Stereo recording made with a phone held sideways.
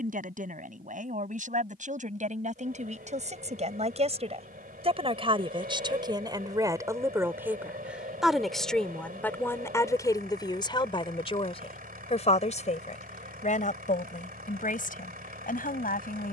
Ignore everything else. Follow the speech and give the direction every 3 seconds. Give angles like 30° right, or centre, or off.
60° right, 40° right, 10° right, 30° left, 50° left, 60° left.